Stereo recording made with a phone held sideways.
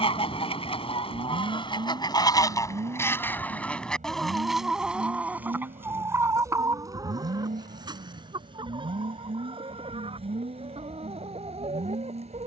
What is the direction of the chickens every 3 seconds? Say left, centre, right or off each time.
left, centre, right, right.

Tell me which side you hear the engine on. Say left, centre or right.
right.